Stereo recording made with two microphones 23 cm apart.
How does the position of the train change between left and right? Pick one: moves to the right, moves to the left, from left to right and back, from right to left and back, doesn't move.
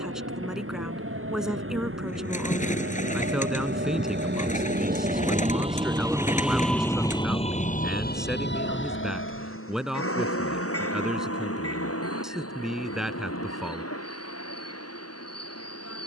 moves to the left.